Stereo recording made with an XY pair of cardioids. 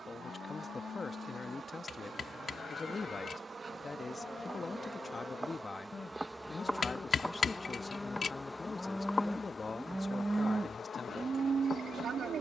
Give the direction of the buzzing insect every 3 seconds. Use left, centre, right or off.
right, right, centre, left.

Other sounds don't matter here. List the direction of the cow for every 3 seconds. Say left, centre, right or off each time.
left, left, left, right.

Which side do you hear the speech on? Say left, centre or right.
left.